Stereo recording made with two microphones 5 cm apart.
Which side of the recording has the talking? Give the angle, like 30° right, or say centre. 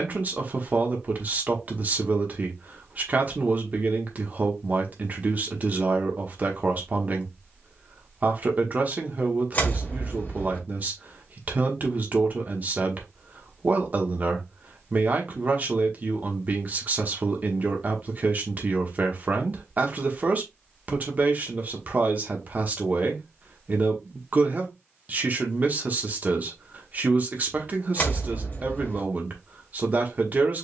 40° right.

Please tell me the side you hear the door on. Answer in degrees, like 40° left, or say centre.
40° left.